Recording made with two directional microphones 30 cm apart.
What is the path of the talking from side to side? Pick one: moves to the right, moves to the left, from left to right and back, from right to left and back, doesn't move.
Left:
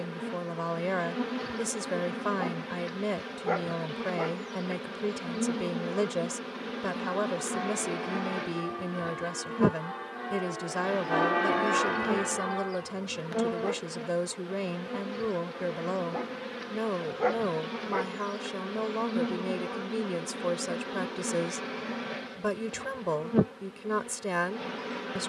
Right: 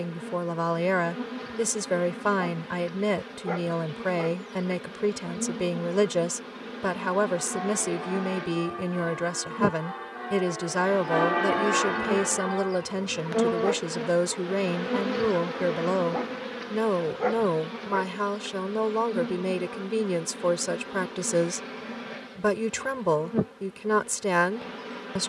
doesn't move.